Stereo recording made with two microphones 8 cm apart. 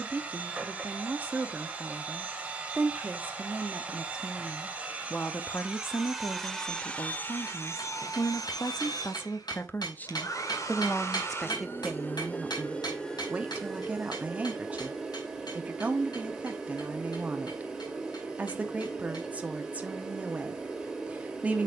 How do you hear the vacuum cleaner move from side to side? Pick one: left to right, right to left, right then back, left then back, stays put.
left then back.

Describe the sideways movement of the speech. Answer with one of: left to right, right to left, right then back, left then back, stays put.
left then back.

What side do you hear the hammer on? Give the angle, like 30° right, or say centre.
70° left.